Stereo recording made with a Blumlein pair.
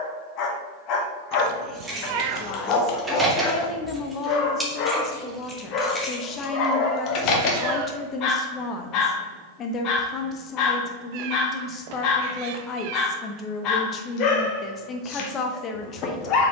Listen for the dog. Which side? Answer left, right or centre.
left.